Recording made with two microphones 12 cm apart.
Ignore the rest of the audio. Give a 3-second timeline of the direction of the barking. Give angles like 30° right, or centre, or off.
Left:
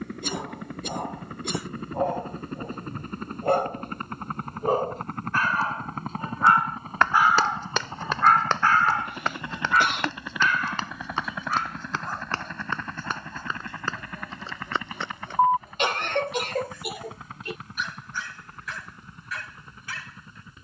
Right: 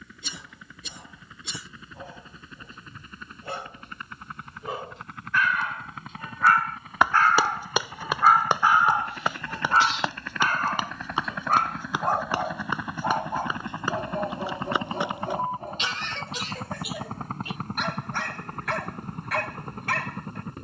60° left, 50° left, centre, 40° right, 60° right, 60° right, 60° right.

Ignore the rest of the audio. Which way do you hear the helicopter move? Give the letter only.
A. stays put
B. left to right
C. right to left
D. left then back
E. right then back
B.